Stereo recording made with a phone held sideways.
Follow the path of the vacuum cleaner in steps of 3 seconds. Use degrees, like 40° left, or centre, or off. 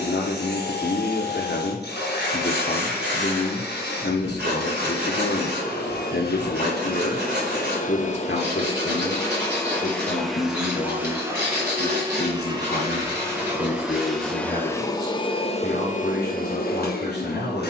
80° left, 80° left, 50° left, centre, 10° right, 50° left.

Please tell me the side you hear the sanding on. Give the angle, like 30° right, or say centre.
70° right.